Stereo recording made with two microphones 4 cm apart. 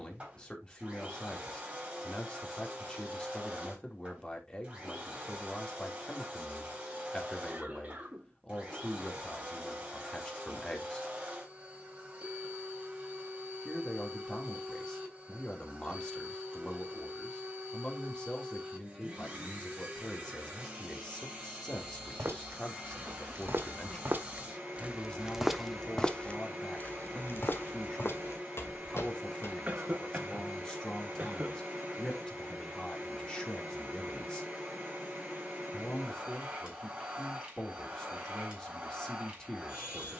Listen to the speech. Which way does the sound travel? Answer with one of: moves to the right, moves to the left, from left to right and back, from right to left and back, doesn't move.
doesn't move.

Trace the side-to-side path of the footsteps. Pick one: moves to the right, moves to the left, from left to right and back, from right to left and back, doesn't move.
moves to the left.